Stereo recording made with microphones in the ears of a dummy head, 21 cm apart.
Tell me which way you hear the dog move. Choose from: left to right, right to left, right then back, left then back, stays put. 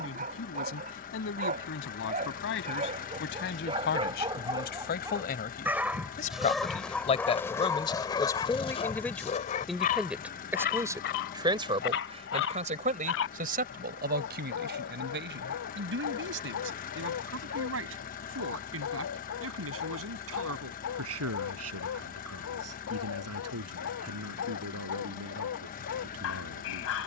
right to left.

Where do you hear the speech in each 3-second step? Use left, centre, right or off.
left, left, left, centre, right, right, right, right, right.